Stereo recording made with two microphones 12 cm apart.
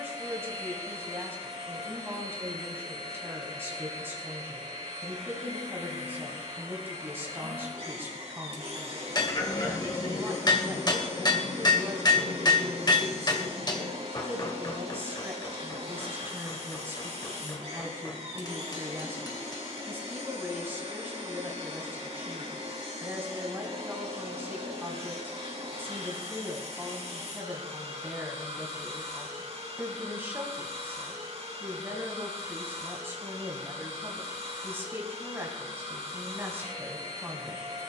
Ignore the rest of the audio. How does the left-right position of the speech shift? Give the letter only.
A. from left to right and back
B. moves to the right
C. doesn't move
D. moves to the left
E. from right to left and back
C.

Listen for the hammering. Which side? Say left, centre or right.
left.